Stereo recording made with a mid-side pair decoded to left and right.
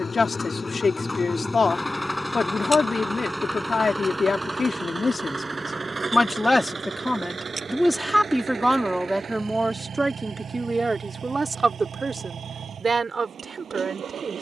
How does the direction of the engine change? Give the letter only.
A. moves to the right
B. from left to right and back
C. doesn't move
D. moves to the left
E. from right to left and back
A.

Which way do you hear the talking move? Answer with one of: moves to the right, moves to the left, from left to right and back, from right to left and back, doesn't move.
moves to the right.